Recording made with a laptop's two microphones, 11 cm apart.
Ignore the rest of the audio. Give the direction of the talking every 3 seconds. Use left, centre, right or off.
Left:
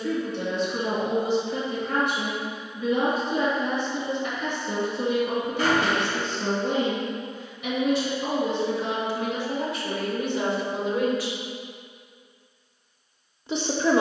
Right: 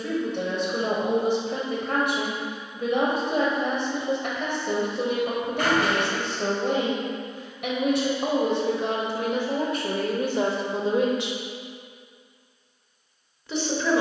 right, right, right, right, left.